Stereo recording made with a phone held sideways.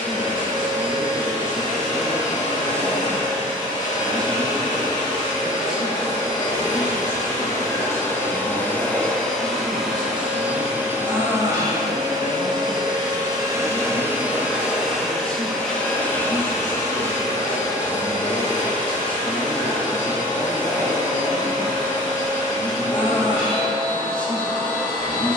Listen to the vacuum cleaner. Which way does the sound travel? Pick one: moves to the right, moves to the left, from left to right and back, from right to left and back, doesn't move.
from left to right and back.